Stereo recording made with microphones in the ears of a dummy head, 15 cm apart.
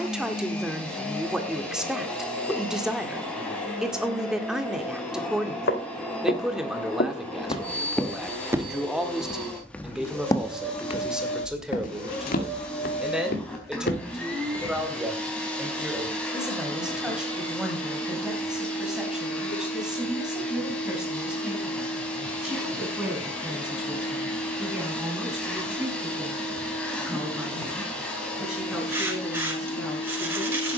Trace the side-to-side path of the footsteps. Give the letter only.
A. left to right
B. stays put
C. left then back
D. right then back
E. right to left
D.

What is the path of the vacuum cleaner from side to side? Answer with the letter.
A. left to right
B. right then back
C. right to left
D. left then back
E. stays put
E.